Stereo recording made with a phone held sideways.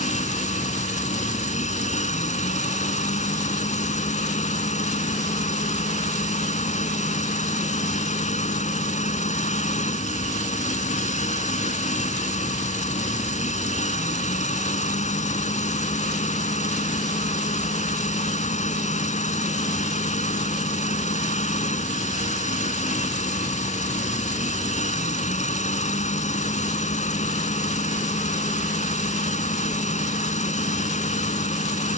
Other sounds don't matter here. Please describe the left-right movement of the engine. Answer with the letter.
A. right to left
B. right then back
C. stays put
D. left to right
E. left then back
C.